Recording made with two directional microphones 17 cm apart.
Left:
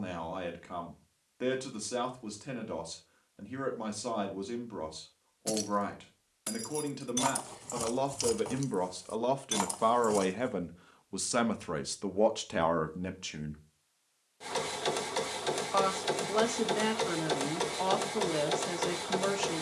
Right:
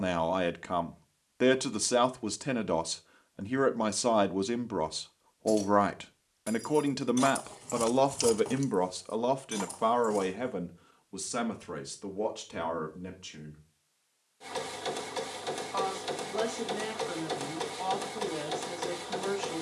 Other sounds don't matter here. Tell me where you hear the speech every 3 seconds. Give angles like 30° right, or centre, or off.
50° right, 50° right, 40° right, 10° left, 40° left, 50° left, 50° left.